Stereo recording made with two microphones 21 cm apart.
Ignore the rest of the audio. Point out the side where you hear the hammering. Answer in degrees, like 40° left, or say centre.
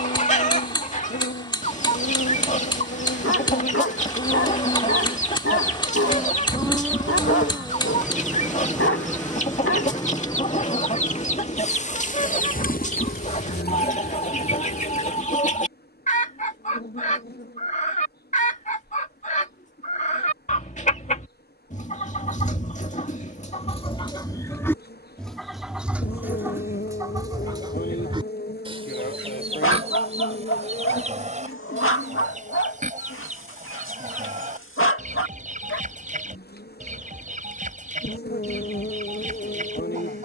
20° left.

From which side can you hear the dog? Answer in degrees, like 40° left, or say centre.
80° left.